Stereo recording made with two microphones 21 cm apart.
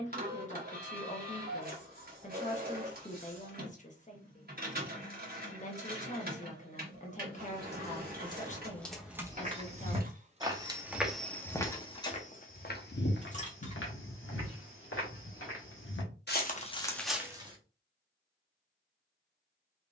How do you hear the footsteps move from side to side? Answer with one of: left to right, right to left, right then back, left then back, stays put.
left then back.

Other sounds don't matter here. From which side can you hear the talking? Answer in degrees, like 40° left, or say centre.
30° left.